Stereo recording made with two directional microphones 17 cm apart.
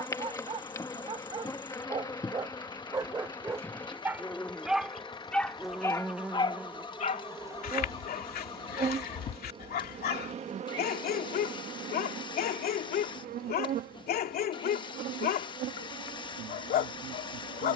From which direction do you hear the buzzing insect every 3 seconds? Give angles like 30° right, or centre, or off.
20° left, 10° left, 20° right, 40° right, 60° right, 70° right.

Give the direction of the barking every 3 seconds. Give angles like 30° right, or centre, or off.
30° right, 10° right, 50° left, 60° left, 60° left, 60° left.